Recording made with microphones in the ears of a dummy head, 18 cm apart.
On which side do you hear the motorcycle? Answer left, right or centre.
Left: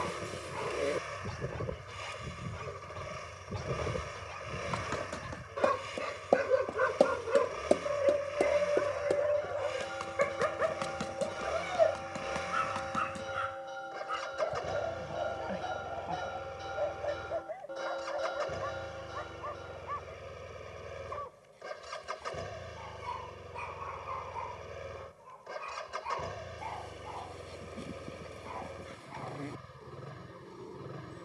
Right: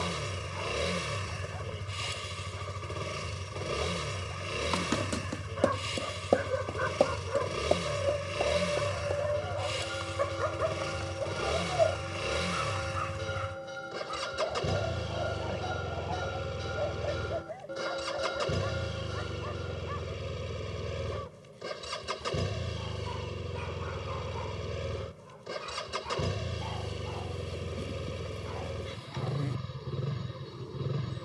right.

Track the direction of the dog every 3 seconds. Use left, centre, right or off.
left, left, left, left, centre, centre, centre, centre, centre, centre, centre.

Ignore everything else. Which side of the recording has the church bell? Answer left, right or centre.
right.